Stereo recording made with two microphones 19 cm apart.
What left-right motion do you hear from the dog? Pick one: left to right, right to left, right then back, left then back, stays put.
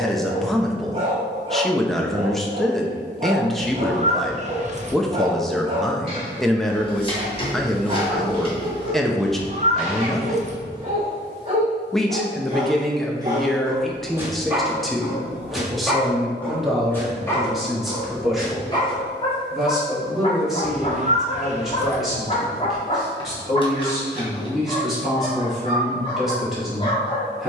right to left.